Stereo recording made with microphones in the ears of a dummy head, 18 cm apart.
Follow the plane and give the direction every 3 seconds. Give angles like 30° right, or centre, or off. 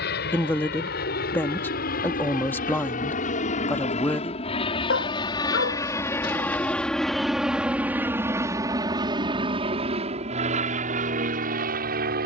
50° left, 30° left, centre, 30° right.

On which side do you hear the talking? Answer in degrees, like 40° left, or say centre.
10° left.